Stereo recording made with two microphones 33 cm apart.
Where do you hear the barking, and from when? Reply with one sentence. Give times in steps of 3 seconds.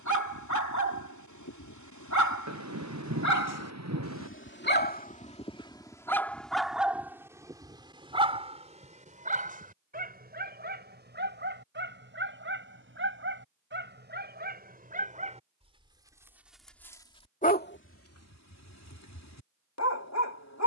You can hear the barking on the left from 0 s, in the centre from 6 s, on the right from 9 s, in the centre from 15 s and on the left from 18 s.